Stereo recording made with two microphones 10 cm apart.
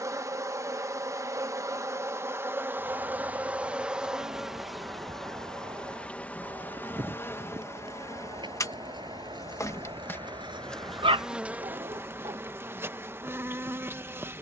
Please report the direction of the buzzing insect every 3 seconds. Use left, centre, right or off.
right, centre, left, centre, right.